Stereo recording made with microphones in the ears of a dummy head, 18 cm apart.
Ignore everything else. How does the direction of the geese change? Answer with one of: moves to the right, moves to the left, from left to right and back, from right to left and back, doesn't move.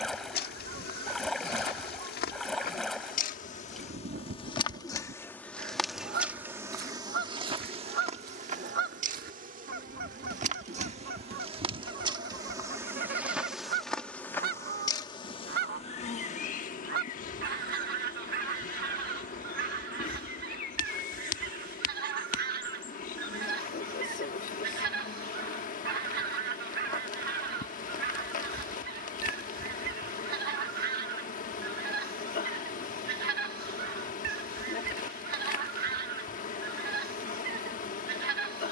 doesn't move.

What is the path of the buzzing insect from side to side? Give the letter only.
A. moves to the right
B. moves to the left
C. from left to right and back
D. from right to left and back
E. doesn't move
C.